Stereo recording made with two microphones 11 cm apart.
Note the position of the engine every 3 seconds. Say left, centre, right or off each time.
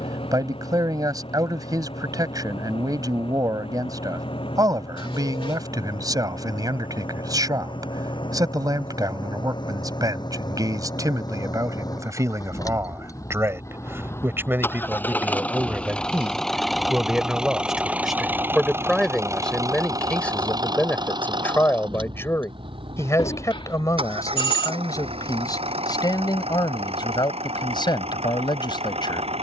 left, left, left, left, left, centre, right, right, right, right.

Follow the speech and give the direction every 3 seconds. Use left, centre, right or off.
right, right, right, right, right, centre, centre, left, left, left.